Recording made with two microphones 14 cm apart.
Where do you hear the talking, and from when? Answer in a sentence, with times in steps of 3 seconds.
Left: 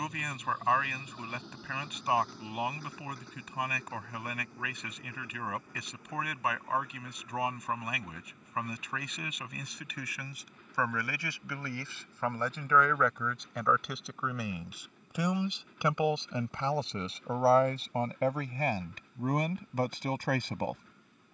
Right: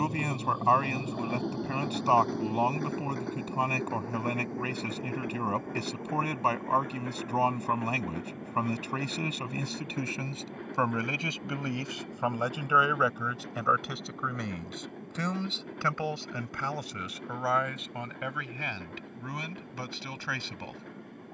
In this clip you hear the talking on the right from 0 s, in the centre from 12 s and on the left from 15 s.